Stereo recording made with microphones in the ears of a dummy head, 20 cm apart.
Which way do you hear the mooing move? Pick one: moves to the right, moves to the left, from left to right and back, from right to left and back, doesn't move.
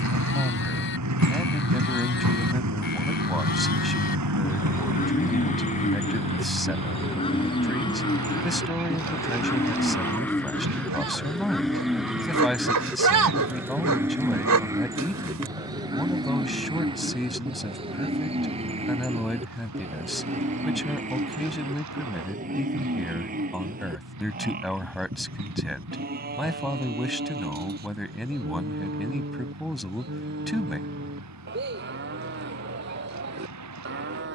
moves to the right.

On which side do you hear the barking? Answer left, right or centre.
right.